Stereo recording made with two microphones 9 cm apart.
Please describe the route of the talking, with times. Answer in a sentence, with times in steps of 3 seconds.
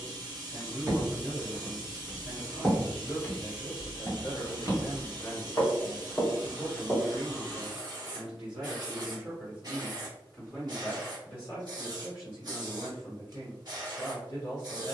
In this clip you hear the talking on the left from 0 s, in the centre from 6 s and on the left from 12 s.